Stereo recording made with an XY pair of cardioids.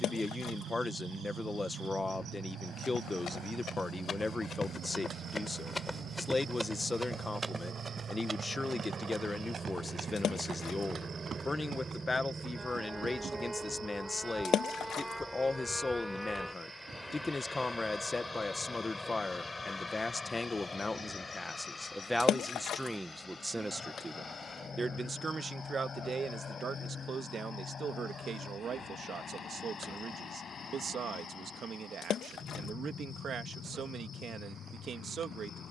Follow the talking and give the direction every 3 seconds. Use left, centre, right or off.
left, left, left, left, left, left, left, centre, right, right, right, right.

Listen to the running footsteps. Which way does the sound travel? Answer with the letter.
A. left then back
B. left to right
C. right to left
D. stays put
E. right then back
B.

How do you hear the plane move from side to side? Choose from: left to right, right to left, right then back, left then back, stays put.
right to left.